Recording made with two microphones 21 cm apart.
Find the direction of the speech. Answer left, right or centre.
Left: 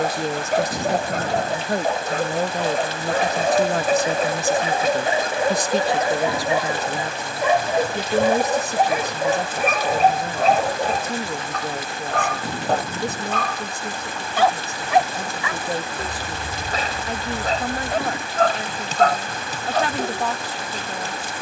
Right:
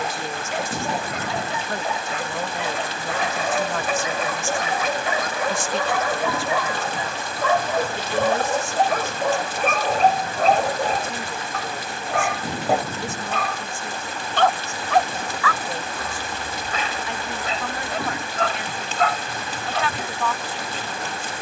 left.